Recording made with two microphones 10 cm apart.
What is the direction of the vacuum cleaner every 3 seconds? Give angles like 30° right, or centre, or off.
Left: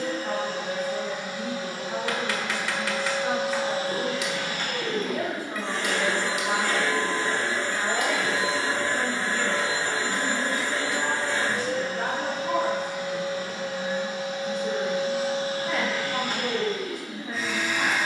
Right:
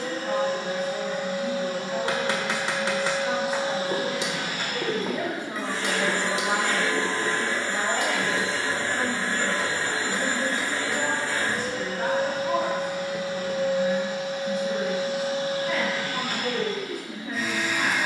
40° right, 20° right, 10° left, 20° left, 30° left, 40° left.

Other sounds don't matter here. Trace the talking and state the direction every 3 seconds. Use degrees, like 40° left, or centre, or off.
40° left, 20° left, 30° right, 10° left, 30° left, 30° left.